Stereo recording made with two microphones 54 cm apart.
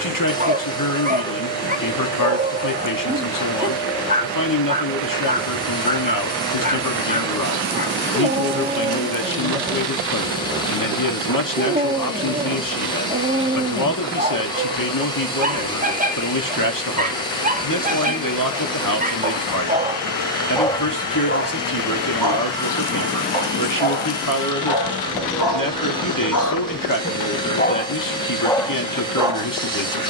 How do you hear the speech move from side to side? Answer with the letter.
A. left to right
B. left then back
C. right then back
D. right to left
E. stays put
E.